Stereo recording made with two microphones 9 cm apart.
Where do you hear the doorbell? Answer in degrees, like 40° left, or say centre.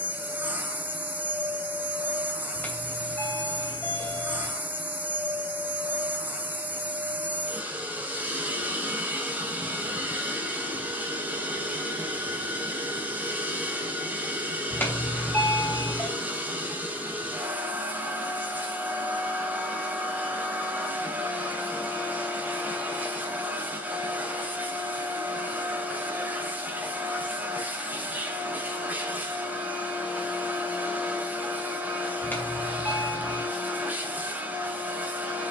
20° left.